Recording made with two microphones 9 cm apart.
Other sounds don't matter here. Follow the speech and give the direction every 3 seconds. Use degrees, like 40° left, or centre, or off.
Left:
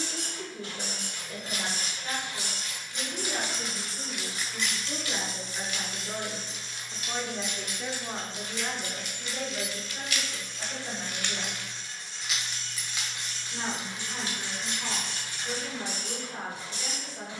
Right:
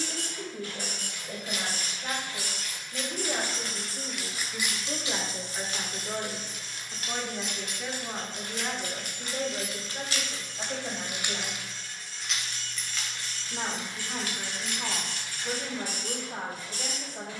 50° right, 40° right, 10° right, 40° right, 50° right, 50° right.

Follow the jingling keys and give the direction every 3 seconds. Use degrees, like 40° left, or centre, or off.
40° left, 10° right, 60° right, 30° right, 20° left, 40° left.